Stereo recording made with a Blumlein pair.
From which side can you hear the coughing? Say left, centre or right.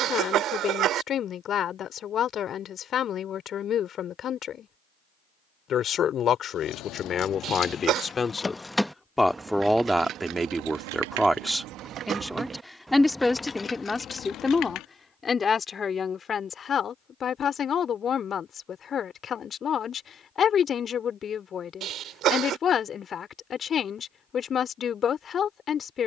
right.